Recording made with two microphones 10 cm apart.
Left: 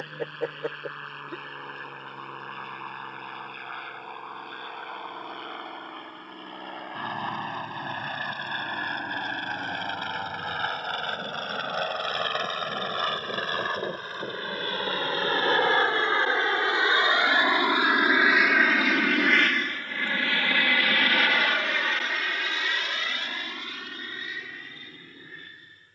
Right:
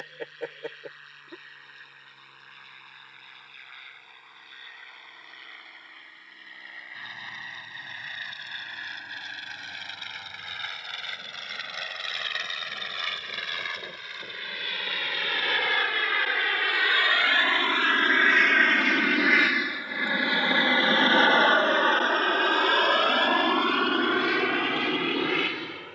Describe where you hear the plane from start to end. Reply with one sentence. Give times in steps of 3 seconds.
You can hear the plane on the left from 0 s, in the centre from 18 s and on the right from 21 s.